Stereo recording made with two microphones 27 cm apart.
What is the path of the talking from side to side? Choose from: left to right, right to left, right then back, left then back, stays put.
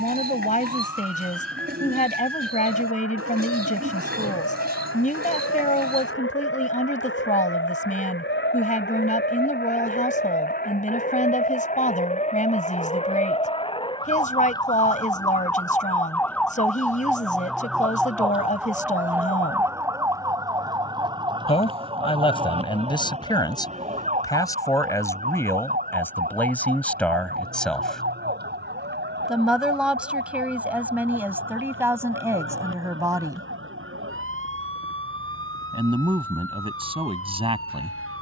left to right.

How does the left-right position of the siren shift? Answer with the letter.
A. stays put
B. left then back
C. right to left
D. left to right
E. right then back
D.